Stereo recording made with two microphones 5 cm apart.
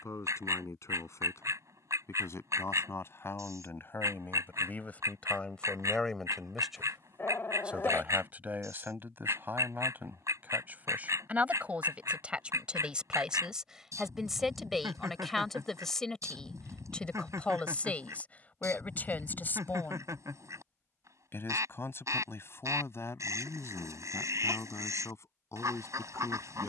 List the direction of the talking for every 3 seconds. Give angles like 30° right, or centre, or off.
60° left, 40° left, 20° right, 30° right, 10° right, 10° left, 30° left, 50° left, 60° left.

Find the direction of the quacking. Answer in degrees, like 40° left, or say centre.
80° right.